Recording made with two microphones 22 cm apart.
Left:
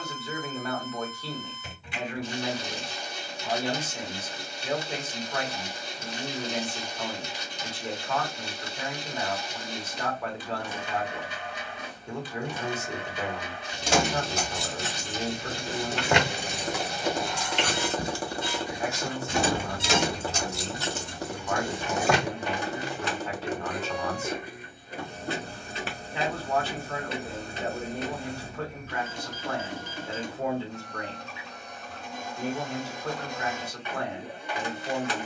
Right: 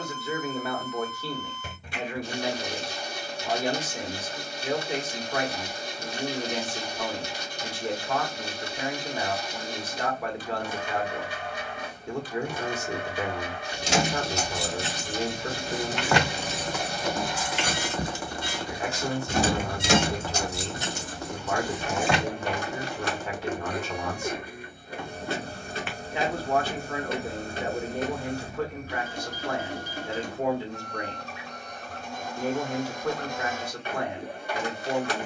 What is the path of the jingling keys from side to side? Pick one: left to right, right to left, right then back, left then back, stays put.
right then back.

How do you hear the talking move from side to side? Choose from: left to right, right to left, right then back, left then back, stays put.
stays put.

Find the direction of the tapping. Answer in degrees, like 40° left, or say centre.
30° left.